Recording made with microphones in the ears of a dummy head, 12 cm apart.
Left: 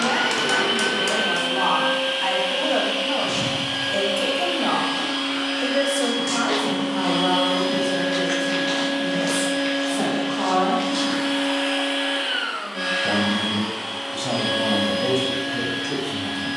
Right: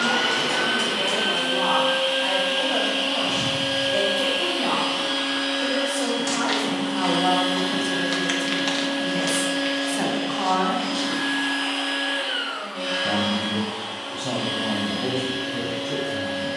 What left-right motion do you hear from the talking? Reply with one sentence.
In this clip you hear the talking move from left to right and back again.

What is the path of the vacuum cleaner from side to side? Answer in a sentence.
You can hear the vacuum cleaner go from the right side to the left.